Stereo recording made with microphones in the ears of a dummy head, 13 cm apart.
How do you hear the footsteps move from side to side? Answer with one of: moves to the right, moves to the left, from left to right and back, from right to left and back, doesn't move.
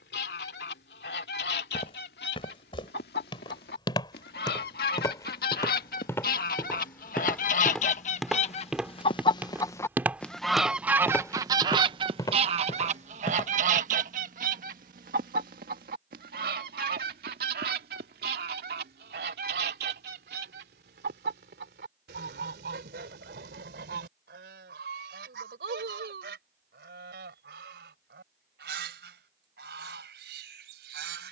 from left to right and back.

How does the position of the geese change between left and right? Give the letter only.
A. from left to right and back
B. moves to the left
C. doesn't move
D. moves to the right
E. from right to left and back
D.